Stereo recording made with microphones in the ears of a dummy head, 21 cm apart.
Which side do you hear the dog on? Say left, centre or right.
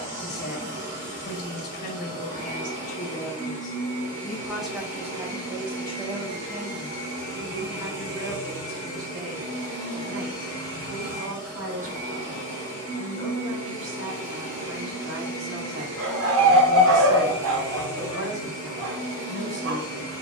right.